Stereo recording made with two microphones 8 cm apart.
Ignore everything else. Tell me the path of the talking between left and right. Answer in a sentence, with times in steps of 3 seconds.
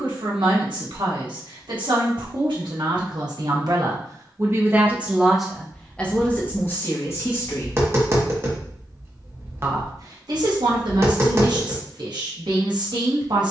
You can hear the talking on the right from 0 s, on the left from 6 s and on the right from 9 s.